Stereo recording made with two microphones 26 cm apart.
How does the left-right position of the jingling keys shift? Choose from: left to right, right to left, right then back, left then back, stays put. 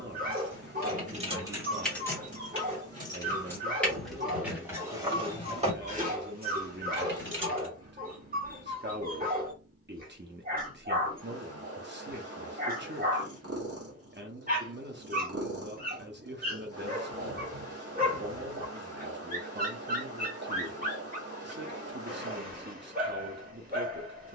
left then back.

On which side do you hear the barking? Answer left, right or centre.
right.